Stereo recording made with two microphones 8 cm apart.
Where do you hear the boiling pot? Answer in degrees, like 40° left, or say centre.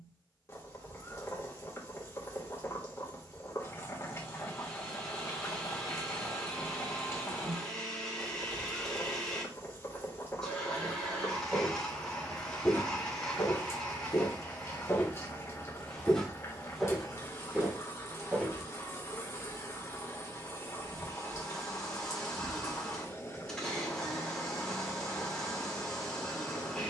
40° left.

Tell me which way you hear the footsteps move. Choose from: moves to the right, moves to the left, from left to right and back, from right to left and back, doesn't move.
from right to left and back.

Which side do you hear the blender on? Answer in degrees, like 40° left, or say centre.
10° left.